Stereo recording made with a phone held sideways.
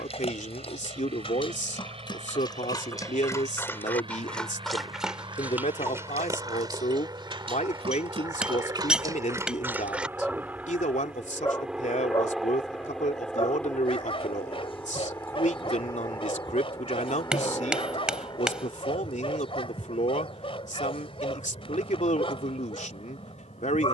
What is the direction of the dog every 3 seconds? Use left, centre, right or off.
left, centre, right, centre, left, left, left, left.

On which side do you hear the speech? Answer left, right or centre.
left.